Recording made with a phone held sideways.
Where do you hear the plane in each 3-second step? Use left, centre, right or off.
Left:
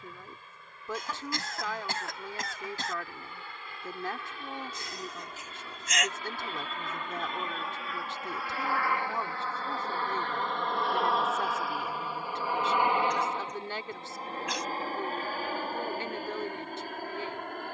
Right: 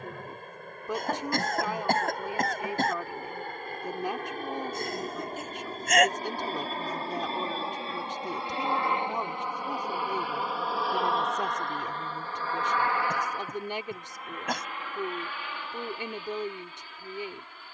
right, right, right, centre, left, left.